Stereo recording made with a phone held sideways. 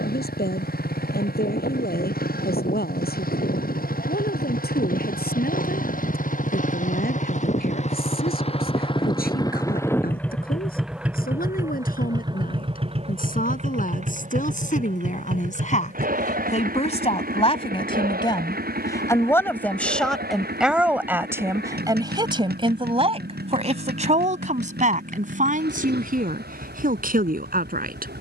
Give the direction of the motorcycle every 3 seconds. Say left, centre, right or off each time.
left, left, left, centre, right, right, right, right, right, right.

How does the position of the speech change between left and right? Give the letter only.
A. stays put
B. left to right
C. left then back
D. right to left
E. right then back
B.